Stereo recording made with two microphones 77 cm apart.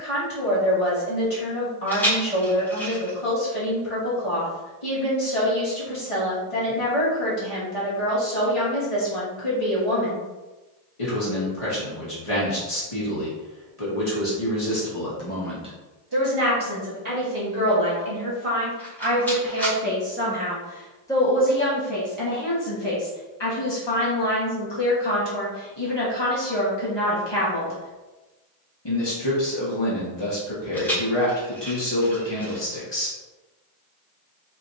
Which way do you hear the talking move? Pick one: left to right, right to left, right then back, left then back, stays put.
right then back.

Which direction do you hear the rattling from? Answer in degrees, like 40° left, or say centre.
centre.